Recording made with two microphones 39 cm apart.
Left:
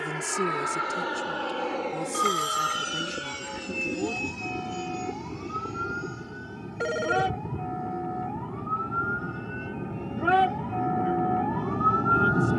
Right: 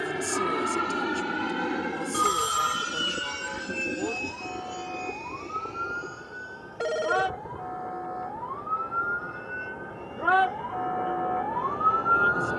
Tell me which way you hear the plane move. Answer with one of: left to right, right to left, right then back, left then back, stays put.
right to left.